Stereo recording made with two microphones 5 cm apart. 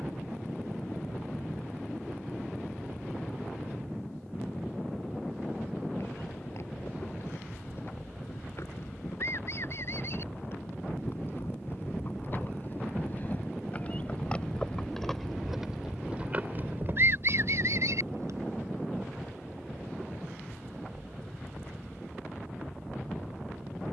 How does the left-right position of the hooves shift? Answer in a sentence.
In this clip you hear the hooves go from the left side to the right.